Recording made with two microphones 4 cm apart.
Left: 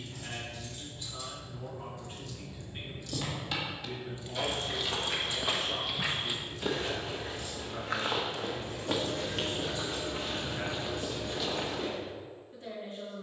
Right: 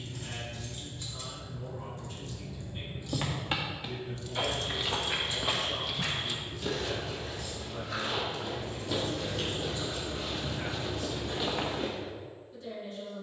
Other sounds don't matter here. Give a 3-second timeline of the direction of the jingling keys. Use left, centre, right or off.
right, left, left, left, off.